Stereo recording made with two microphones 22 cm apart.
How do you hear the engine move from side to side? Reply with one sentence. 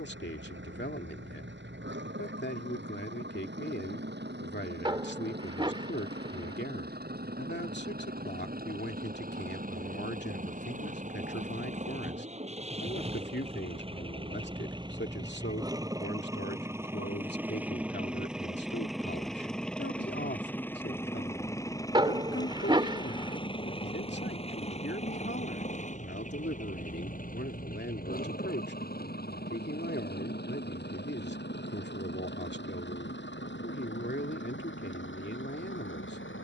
In this clip you hear the engine travel towards the left.